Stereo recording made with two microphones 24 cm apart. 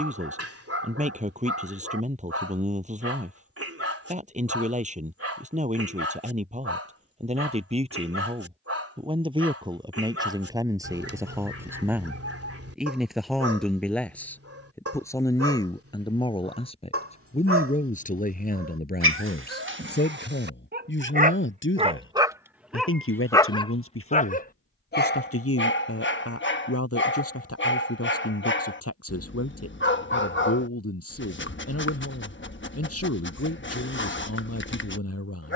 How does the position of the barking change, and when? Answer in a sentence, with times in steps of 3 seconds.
In this clip you hear the barking on the right from 0 s, in the centre from 21 s and on the left from 24 s.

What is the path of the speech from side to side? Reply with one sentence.
In this clip you hear the speech move from right to left.